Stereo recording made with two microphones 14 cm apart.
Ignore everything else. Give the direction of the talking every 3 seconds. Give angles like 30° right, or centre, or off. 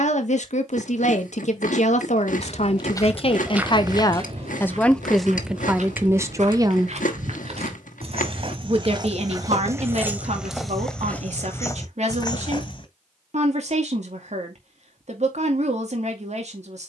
60° left, 20° left, 30° right, 50° right, 60° right, 60° right.